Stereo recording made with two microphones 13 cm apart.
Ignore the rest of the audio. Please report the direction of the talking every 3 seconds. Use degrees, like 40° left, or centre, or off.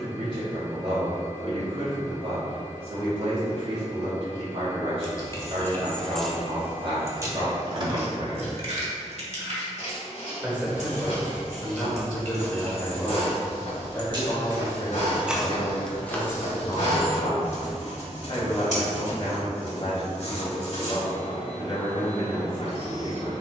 50° right, 50° right, 50° right, 10° right, 20° left, 40° left, 50° left, 50° left.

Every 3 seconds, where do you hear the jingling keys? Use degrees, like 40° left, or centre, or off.
off, 20° left, 30° right, 70° right, 50° right, 10° left, off, off.